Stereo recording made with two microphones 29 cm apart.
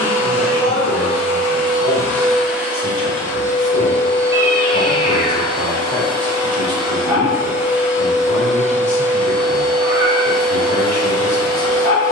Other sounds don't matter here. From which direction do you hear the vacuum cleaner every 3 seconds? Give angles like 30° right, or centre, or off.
10° left, 20° right, 10° right, 10° left.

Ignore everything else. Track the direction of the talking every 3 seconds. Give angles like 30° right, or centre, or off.
50° left, 40° left, centre, 30° left.